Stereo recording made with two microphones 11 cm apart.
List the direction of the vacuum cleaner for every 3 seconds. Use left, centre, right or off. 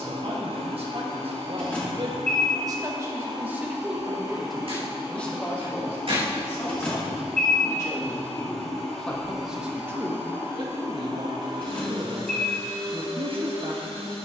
right, right, centre, right, right.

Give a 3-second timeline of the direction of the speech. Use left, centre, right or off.
right, centre, left, right, right.